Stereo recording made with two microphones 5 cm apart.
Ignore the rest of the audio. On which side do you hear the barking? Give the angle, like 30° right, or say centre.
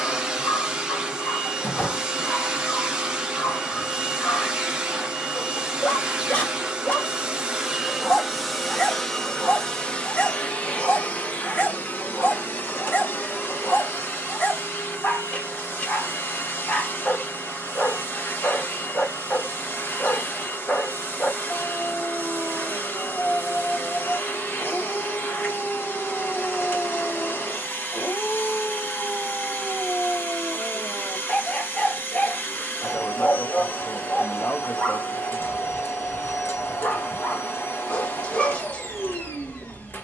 30° left.